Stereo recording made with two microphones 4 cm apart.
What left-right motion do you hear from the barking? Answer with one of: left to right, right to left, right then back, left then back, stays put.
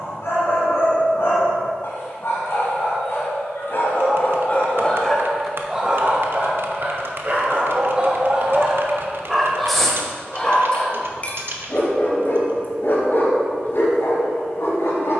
right then back.